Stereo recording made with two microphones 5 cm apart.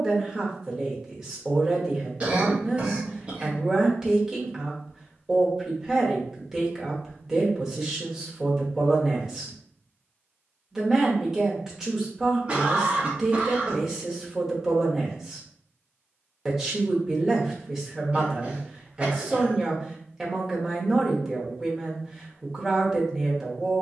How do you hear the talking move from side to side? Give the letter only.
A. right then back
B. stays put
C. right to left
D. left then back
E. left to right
B.